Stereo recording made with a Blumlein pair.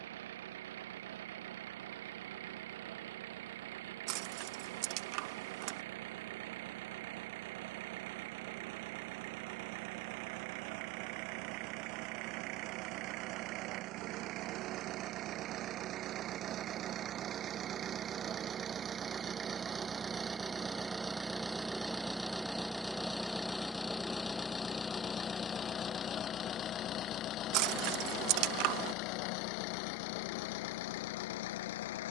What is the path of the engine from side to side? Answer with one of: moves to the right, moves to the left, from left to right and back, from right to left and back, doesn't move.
moves to the left.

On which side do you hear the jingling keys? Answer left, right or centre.
right.